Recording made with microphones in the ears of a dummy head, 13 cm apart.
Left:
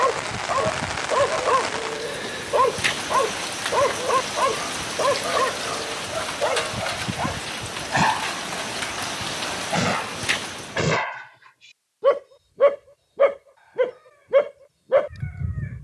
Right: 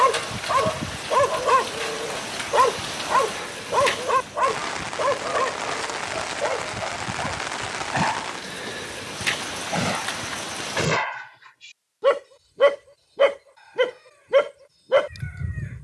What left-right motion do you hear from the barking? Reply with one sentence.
You can hear the barking move from right to left and back again.